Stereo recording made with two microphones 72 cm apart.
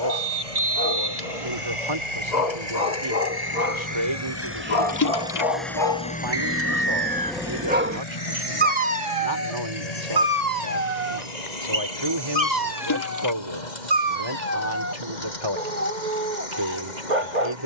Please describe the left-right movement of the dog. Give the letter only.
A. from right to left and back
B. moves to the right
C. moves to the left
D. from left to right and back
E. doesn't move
B.